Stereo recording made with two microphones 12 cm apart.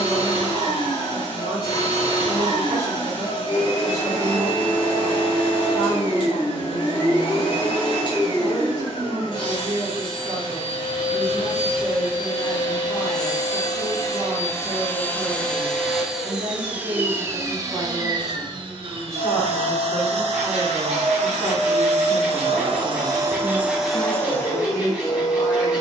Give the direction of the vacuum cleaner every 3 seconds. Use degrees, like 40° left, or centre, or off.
50° left, 50° left, 50° left, 50° left, 30° left, 10° right, 50° right, 40° right, 30° left.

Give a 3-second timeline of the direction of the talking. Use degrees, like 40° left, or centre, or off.
50° right, 50° right, 50° right, 50° right, 50° right, 50° right, 20° right, 20° left, 30° left.